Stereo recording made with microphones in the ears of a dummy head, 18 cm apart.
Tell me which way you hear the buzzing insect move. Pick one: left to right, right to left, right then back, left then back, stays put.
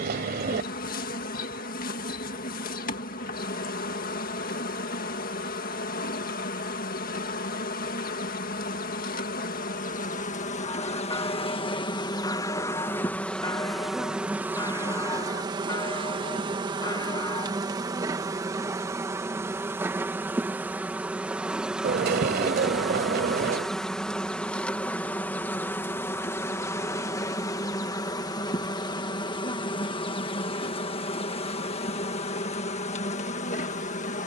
right then back.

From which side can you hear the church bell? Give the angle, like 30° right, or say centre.
20° left.